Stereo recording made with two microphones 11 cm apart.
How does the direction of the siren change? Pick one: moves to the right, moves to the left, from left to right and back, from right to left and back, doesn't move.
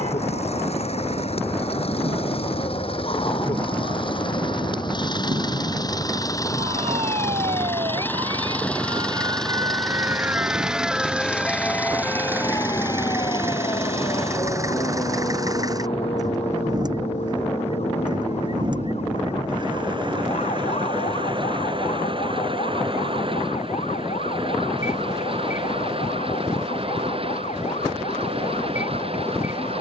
moves to the left.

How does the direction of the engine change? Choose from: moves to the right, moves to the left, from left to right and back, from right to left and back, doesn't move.
moves to the right.